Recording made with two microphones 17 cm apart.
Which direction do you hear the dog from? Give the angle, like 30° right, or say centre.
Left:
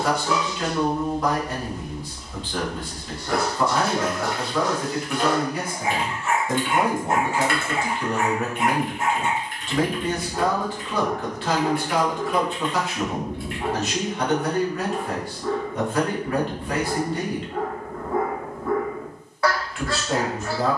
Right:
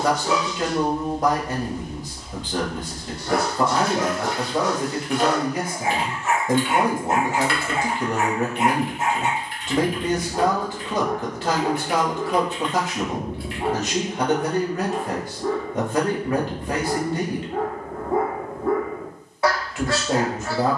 20° right.